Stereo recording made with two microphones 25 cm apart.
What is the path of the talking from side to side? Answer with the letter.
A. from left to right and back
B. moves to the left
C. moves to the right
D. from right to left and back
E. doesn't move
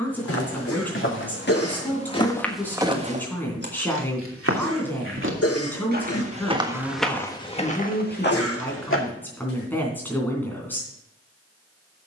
E.